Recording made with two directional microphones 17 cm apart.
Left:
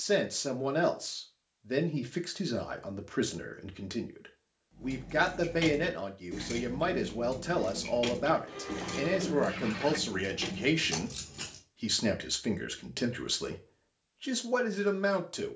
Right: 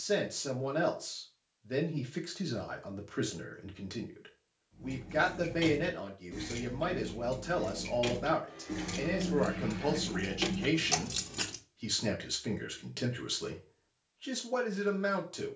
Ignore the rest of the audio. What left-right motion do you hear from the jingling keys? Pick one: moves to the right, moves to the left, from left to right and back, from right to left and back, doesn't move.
moves to the right.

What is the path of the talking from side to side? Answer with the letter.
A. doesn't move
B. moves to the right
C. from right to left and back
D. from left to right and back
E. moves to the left
A.